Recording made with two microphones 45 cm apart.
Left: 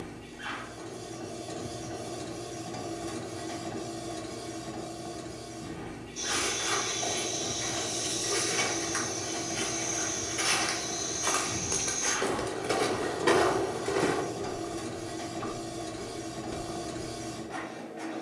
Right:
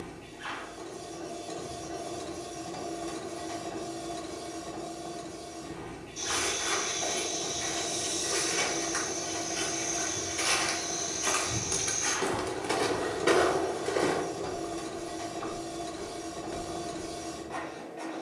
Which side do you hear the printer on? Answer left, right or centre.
left.